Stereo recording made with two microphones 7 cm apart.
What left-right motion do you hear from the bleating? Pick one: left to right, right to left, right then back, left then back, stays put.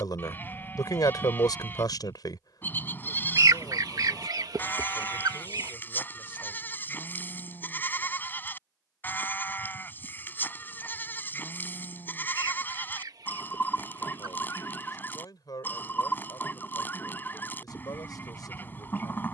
stays put.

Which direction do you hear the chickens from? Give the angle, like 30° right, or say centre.
60° right.